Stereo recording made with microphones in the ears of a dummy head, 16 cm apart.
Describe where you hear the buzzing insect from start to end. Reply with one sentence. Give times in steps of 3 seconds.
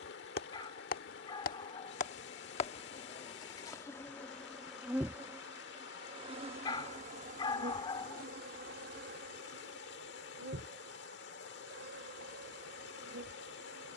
In this clip you hear the buzzing insect on the left from 0 s, in the centre from 3 s and on the right from 6 s.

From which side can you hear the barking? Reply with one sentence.
In this clip you hear the barking on the left.